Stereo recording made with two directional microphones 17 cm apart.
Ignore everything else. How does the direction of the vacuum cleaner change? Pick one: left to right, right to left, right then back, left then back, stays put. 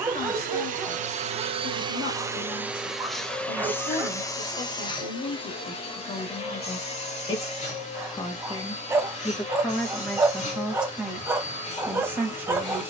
right to left.